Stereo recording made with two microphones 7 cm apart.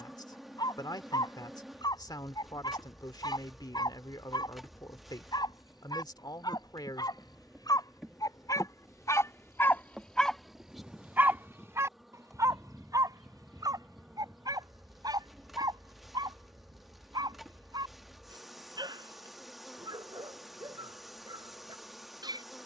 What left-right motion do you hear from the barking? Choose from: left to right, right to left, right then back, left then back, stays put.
left to right.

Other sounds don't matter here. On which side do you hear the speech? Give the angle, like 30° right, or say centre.
70° left.